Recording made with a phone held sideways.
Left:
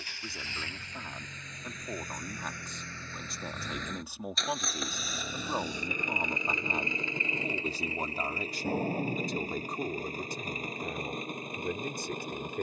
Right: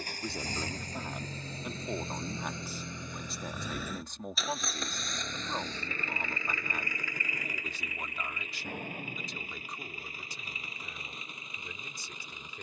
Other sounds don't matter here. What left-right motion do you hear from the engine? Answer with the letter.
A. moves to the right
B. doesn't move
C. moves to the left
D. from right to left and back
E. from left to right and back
C.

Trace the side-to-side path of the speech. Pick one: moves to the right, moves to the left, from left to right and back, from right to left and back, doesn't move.
moves to the left.